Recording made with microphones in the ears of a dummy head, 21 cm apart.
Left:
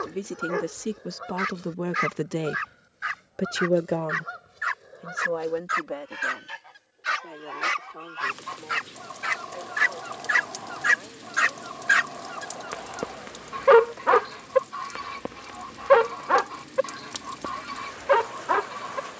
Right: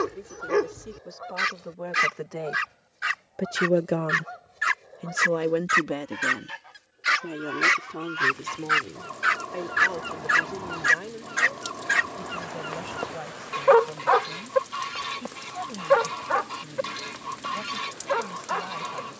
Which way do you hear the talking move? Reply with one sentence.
You can hear the talking travel towards the right.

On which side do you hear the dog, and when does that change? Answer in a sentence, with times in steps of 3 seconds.
In this clip you hear the dog on the right from 0 s, in the centre from 9 s and on the left from 12 s.